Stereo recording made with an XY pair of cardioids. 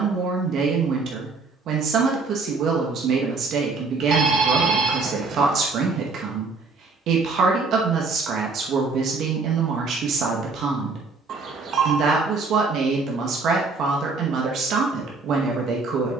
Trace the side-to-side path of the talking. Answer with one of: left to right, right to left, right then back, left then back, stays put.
stays put.